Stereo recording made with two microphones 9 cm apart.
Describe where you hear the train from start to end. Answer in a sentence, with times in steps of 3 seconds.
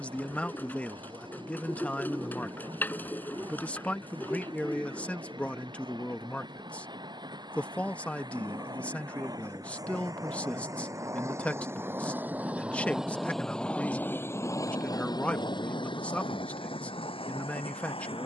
In this clip you hear the train on the right from 0 s, in the centre from 12 s and on the left from 15 s.